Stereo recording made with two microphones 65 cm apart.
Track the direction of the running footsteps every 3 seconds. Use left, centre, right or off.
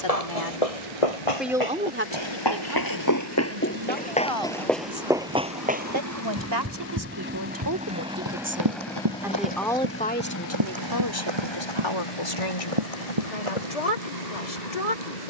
left, centre, right, right, right.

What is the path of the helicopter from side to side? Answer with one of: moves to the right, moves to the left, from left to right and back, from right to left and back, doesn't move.
moves to the left.